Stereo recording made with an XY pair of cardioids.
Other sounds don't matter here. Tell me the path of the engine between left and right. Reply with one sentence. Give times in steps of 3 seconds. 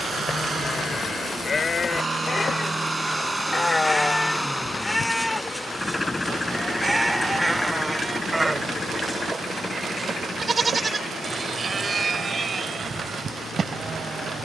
In this clip you hear the engine on the right from 0 s, in the centre from 3 s and on the left from 6 s.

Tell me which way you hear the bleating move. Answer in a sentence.
In this clip you hear the bleating go from the left side to the right.